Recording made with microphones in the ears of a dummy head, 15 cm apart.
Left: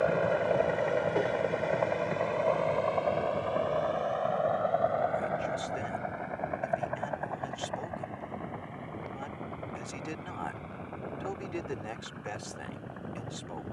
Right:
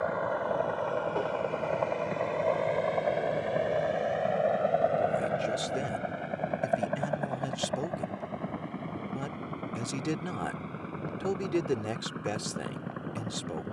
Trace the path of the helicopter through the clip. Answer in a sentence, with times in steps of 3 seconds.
In this clip you hear the helicopter in the centre from 0 s and on the right from 3 s.